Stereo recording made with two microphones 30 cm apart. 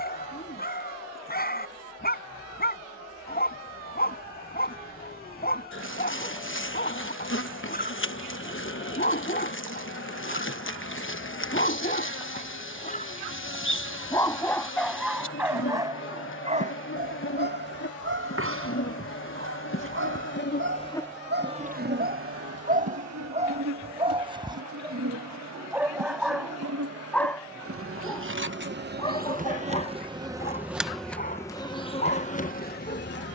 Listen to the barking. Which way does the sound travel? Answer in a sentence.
You can hear the barking move from left to right and back again.